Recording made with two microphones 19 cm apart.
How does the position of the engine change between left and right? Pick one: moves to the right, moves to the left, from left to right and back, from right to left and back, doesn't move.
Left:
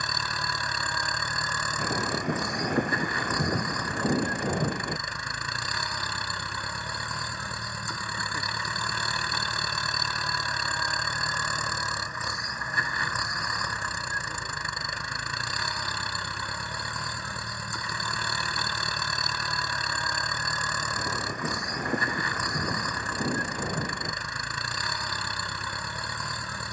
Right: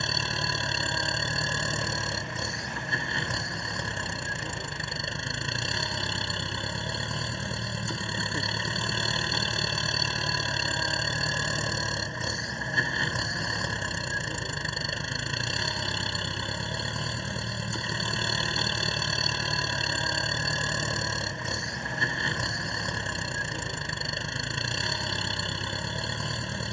doesn't move.